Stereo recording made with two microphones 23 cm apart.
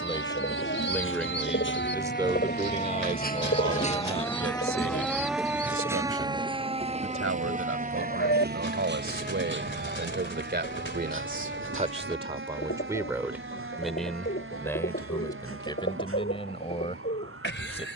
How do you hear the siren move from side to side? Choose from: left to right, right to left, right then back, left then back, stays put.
left to right.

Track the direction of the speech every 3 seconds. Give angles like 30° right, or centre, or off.
centre, 60° right, 70° right, 50° right, 10° right, 20° left.